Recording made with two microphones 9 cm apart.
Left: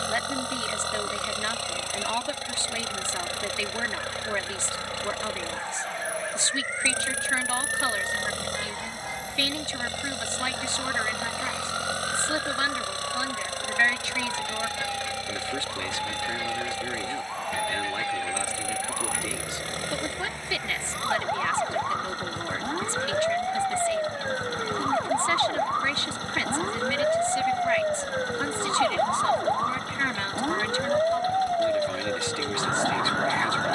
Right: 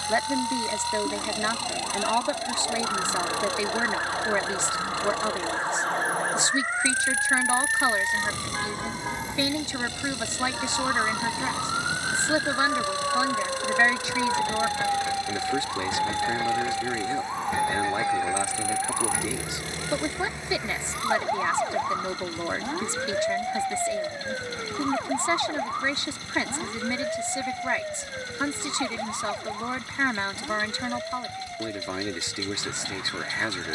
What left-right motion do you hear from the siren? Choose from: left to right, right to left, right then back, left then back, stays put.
right to left.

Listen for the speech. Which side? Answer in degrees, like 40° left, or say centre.
20° right.